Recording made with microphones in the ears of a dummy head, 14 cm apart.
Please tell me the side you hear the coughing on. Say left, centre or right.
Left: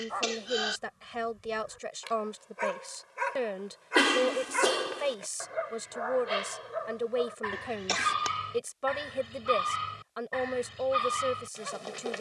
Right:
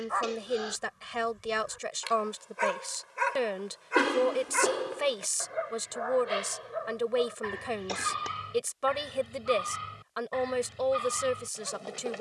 left.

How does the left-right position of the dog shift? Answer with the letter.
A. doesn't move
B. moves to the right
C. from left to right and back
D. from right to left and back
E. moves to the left
E.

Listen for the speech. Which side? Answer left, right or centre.
right.